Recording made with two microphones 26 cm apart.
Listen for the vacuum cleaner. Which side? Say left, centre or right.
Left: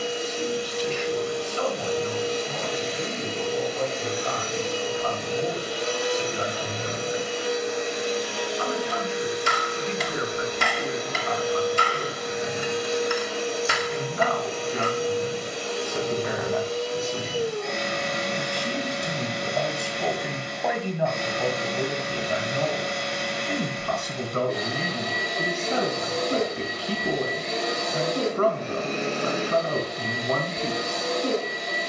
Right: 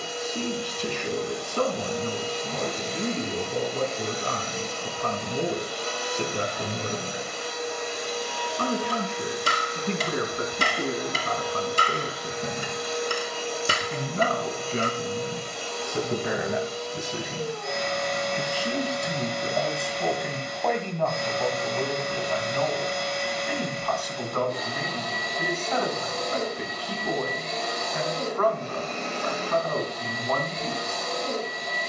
left.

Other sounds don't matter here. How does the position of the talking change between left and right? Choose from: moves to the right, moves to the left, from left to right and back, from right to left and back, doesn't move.
moves to the left.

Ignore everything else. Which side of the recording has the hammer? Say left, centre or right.
right.